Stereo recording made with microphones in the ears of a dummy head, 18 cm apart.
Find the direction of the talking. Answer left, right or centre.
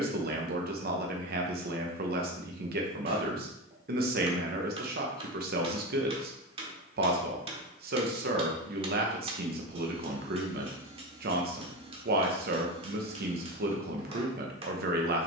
right.